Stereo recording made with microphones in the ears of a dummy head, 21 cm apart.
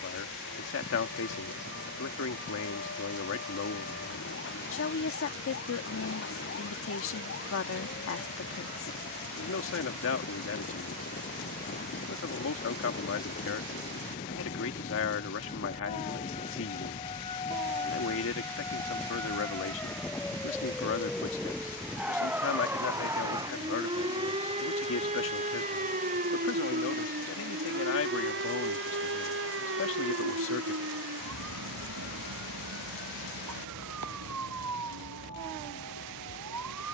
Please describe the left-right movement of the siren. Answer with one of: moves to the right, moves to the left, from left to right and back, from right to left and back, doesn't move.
moves to the right.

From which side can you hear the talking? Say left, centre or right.
left.